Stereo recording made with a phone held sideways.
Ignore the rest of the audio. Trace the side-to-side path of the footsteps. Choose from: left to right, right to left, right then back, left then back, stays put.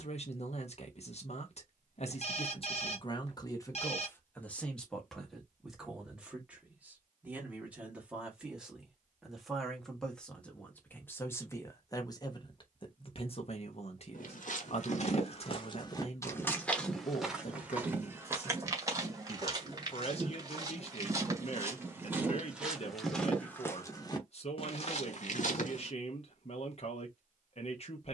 right then back.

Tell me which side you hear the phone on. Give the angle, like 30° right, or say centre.
50° left.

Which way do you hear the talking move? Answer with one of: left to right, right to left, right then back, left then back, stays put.
right then back.